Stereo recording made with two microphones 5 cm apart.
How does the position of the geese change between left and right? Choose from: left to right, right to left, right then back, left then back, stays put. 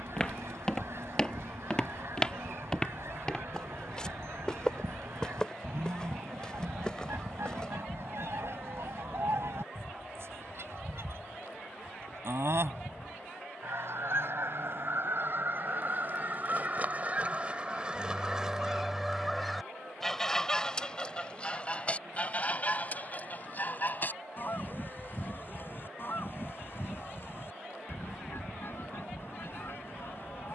right to left.